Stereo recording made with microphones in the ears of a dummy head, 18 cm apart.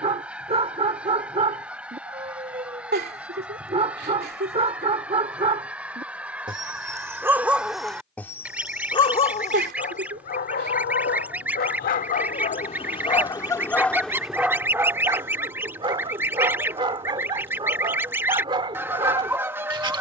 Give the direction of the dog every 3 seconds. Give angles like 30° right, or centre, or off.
30° right, 30° right, centre, 40° left, 10° left, 20° right, 20° right.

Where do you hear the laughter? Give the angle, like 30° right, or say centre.
50° right.